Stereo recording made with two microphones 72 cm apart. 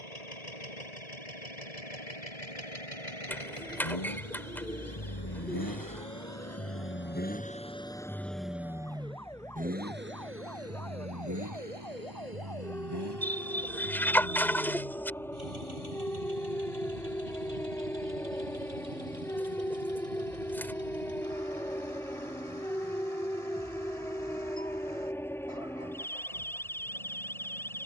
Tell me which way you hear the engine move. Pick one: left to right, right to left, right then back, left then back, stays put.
left to right.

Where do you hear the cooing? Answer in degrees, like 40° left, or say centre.
centre.